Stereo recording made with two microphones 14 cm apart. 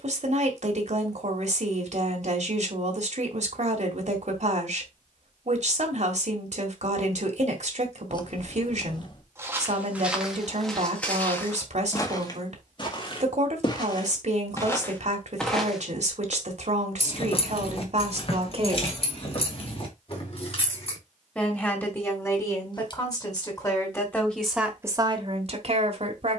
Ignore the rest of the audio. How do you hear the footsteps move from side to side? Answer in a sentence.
In this clip you hear the footsteps move from right to left and back again.